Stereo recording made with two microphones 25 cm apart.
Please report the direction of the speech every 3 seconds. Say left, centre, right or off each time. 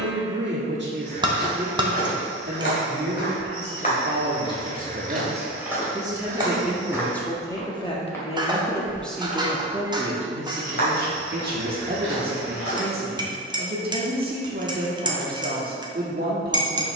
right, right, centre, right, right, right.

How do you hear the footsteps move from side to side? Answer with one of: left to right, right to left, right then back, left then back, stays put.
right then back.